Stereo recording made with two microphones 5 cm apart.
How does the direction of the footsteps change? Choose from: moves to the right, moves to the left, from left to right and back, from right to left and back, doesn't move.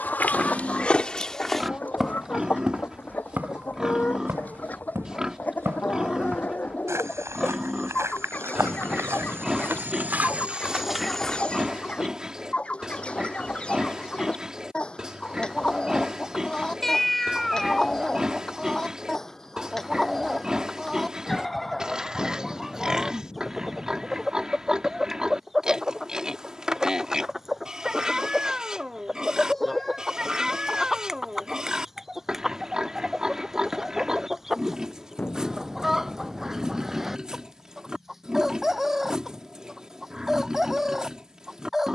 from left to right and back.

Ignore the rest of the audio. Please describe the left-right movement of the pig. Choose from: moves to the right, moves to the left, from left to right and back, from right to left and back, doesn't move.
doesn't move.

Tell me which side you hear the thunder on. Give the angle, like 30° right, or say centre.
30° left.